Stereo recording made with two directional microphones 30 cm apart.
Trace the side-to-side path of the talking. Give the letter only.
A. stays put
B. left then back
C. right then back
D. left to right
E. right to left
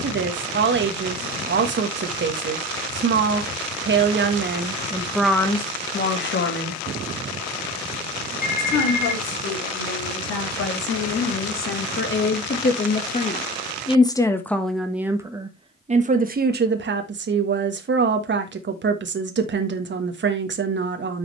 B.